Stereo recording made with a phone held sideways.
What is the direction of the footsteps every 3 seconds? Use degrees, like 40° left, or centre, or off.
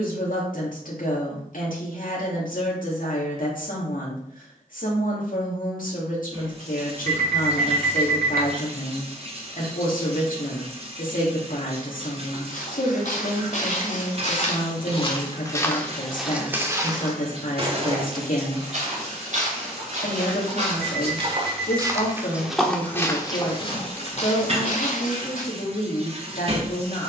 off, off, off, off, 60° left, 10° right, 50° right, centre, 60° left.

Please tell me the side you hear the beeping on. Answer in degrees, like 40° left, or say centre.
70° right.